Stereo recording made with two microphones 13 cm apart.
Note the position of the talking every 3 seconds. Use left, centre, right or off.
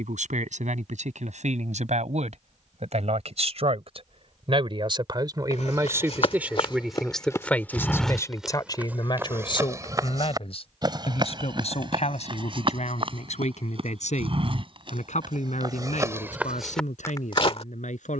right, right, centre, left, left, left.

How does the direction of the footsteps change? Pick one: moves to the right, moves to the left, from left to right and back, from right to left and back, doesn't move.
from left to right and back.